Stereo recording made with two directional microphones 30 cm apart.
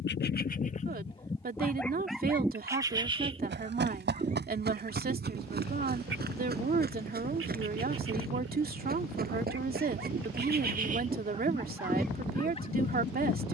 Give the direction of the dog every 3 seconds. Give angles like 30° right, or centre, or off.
10° left, 30° right, 50° right, 30° right, 30° left.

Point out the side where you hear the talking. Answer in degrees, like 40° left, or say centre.
30° right.